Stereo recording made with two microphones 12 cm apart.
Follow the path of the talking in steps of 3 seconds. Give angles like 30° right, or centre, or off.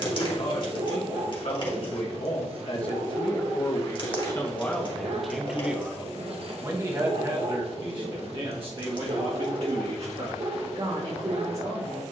60° left, 20° left, 40° right, 50° right.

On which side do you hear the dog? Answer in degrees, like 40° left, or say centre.
50° right.